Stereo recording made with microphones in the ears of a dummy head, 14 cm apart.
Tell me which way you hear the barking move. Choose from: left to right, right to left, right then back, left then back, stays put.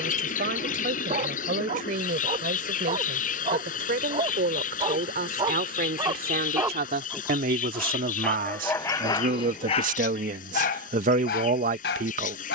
right to left.